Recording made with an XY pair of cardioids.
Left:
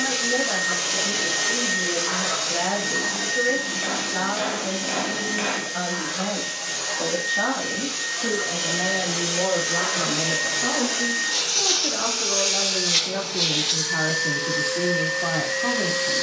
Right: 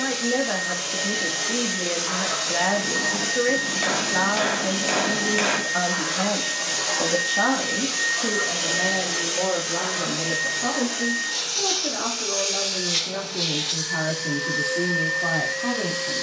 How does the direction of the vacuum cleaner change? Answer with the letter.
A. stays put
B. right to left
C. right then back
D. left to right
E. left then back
C.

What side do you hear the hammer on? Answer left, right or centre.
right.